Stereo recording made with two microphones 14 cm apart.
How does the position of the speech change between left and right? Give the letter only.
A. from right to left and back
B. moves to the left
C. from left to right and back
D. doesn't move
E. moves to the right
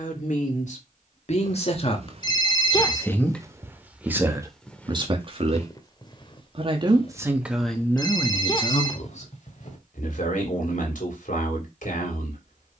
C.